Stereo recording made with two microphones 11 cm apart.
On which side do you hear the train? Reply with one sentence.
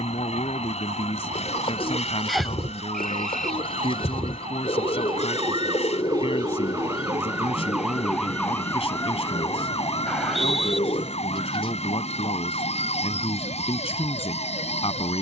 In this clip you hear the train on the left.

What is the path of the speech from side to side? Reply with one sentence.
In this clip you hear the speech stay put.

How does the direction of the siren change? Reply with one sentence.
In this clip you hear the siren travel towards the left.